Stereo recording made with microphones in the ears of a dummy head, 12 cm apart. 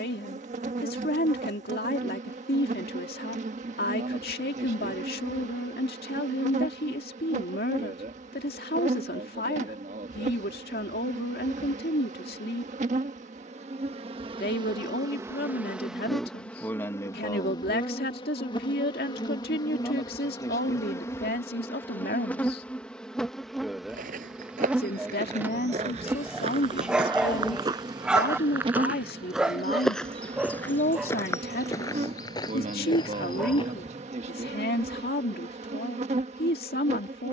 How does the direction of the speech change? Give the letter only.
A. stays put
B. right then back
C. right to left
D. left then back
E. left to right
A.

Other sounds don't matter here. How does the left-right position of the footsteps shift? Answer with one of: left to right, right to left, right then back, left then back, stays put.
right to left.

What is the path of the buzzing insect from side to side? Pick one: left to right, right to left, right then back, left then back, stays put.
left then back.